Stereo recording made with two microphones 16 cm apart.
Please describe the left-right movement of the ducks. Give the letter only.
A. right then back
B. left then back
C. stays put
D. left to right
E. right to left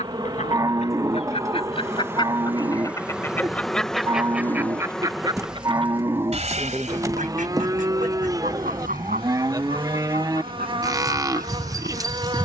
D.